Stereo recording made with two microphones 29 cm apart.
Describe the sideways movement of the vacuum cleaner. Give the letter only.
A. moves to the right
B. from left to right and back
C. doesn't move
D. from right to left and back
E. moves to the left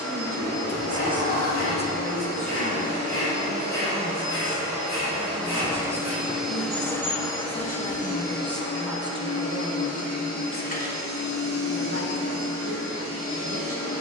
E.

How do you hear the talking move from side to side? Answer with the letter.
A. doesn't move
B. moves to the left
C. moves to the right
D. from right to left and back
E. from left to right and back
D.